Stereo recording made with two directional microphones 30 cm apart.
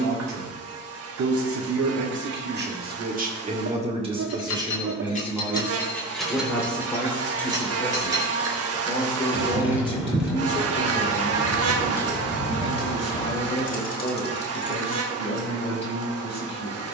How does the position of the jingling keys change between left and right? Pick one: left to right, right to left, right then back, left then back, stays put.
right then back.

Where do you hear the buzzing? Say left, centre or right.
right.